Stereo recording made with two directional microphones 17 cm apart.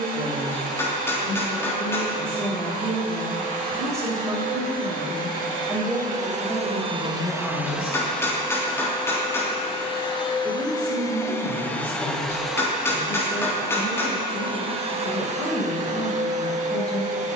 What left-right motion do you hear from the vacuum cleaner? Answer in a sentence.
In this clip you hear the vacuum cleaner go left and come back.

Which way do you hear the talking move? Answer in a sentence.
In this clip you hear the talking move to the left.